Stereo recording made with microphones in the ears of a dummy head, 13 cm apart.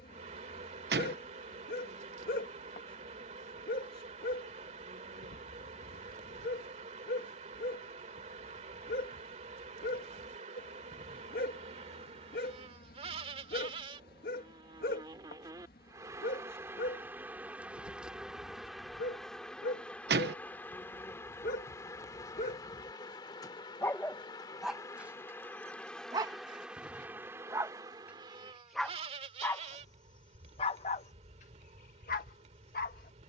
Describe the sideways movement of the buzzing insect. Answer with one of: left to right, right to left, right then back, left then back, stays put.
left then back.